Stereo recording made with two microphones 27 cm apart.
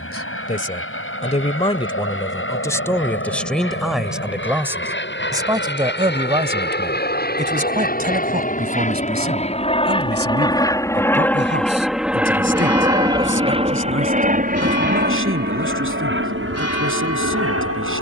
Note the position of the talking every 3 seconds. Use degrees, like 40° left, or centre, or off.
20° left, 10° right, 30° right, 50° right, 50° right, 60° right.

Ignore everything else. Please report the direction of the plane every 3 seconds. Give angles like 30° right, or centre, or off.
60° left, 50° left, 40° left, 20° left, 20° right, 50° right.